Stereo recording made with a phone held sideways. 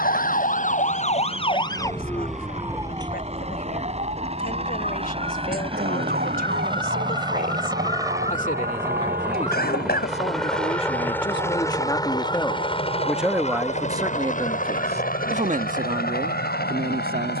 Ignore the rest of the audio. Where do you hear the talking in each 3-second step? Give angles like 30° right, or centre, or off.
60° left, 60° left, 50° left, 40° left, 10° right, 60° right.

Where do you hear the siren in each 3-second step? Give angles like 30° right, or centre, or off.
30° left, 50° right, 70° right, 80° right, 80° right, 80° right.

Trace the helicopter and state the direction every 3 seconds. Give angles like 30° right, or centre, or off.
50° right, 40° right, 30° right, centre, 40° left, 60° left.